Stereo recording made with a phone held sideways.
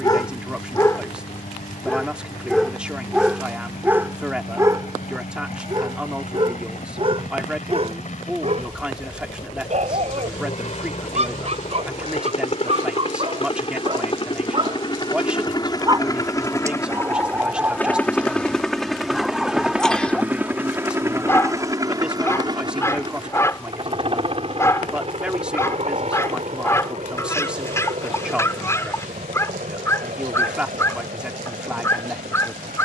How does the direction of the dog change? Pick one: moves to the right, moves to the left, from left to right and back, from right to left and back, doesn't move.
from left to right and back.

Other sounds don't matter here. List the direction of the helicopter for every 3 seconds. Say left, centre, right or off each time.
left, left, left, left, left, left, centre, right, right, right, right.